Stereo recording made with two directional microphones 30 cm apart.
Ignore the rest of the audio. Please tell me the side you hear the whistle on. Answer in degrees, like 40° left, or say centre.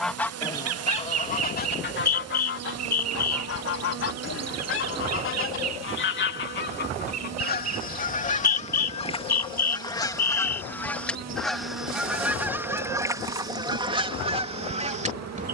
30° left.